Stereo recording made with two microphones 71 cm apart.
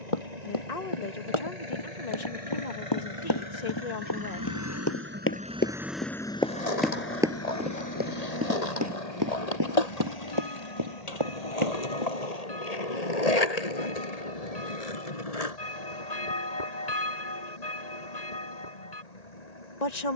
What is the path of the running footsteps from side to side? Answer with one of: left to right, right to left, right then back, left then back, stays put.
left to right.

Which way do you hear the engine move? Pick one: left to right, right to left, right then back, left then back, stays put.
right to left.